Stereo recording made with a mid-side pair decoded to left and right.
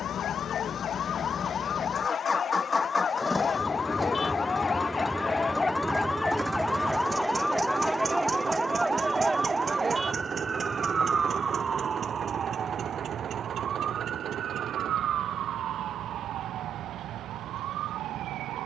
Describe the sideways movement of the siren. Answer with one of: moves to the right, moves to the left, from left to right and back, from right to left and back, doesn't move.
moves to the right.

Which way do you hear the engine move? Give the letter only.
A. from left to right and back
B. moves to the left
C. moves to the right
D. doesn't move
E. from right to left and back
C.